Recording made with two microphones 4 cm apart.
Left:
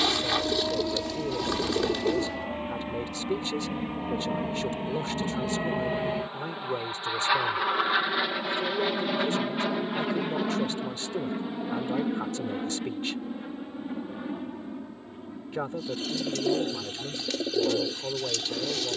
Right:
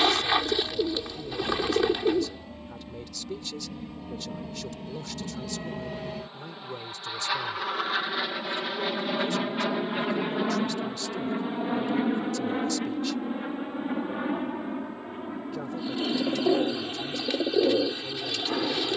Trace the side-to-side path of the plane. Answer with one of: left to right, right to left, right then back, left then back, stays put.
left to right.